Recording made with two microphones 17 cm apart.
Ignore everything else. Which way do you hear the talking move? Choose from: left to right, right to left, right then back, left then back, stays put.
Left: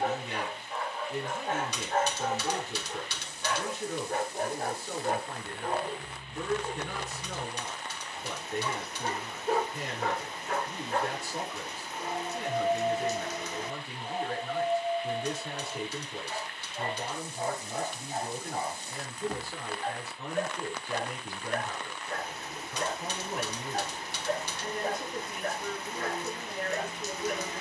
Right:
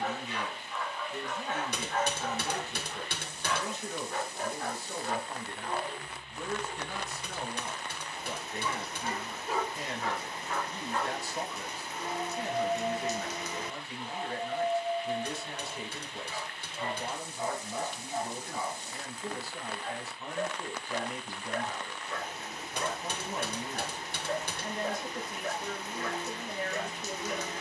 stays put.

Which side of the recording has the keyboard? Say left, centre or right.
right.